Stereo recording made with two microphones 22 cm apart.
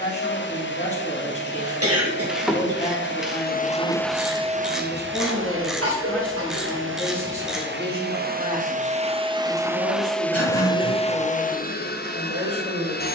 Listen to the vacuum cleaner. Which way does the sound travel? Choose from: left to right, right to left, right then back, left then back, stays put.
right then back.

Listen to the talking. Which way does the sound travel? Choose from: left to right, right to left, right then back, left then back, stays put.
left to right.